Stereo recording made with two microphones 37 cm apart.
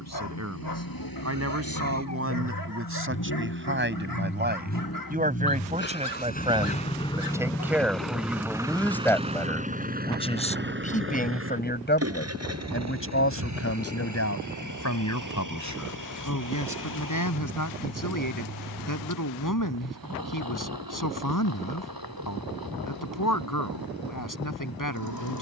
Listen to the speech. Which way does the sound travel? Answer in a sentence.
You can hear the speech move from right to left.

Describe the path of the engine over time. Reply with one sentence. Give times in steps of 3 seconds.
You can hear the engine on the left from 0 s, in the centre from 6 s and on the right from 9 s.